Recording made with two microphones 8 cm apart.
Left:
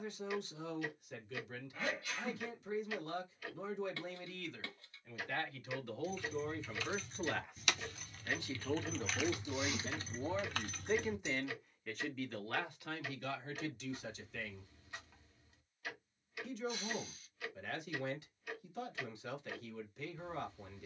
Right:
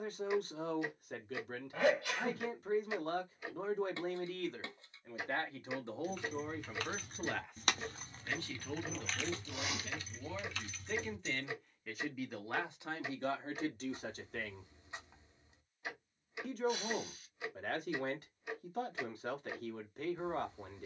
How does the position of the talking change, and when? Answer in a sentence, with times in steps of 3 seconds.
You can hear the talking on the right from 0 s, in the centre from 6 s, on the left from 9 s and on the right from 12 s.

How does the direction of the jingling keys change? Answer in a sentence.
You can hear the jingling keys move to the left.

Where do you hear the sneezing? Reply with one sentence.
In this clip you hear the sneezing on the right.